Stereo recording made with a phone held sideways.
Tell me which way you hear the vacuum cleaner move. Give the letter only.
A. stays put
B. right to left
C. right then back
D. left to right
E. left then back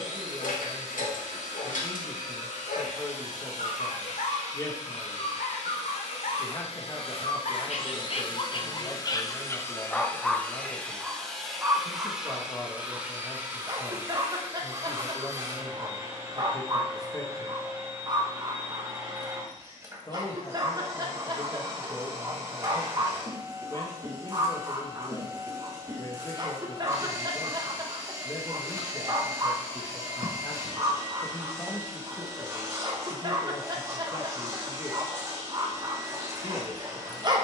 D.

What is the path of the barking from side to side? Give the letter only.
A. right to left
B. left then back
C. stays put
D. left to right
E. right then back
D.